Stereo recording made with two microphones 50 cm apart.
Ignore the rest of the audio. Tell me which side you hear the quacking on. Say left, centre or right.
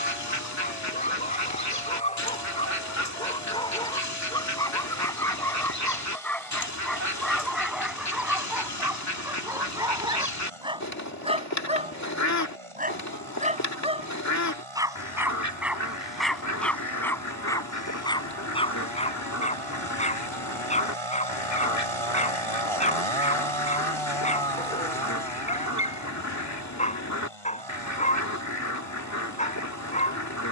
left.